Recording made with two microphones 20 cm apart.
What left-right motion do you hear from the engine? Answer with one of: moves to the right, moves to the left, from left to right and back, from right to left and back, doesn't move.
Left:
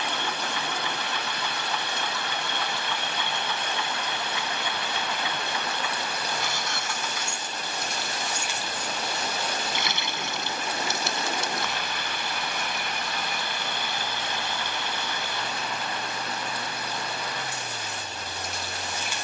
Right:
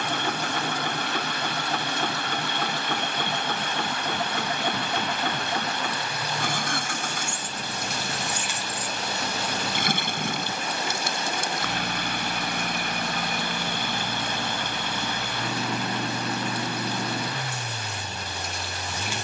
doesn't move.